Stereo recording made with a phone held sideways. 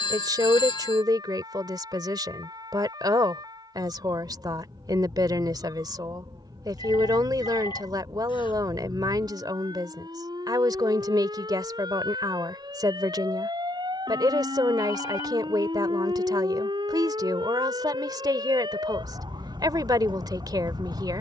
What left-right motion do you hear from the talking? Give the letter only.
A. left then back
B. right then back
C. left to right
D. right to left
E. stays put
E.